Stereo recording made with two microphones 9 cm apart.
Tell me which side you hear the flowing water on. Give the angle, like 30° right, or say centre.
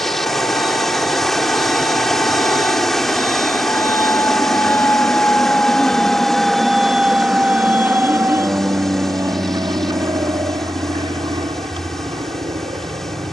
centre.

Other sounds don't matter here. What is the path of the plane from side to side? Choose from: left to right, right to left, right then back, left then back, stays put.
left to right.